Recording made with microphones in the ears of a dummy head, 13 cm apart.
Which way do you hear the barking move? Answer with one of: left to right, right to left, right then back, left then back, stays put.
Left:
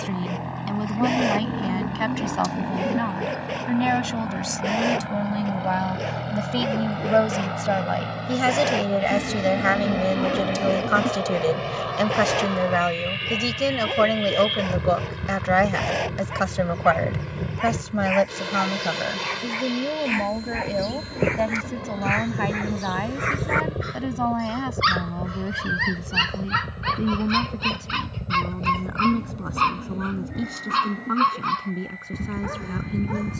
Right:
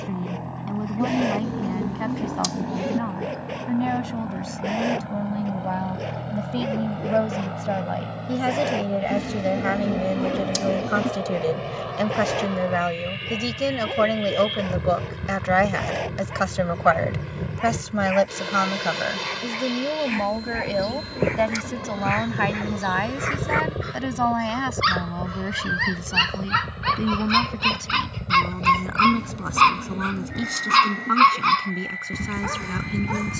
left to right.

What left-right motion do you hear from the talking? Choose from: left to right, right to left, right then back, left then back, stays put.
left to right.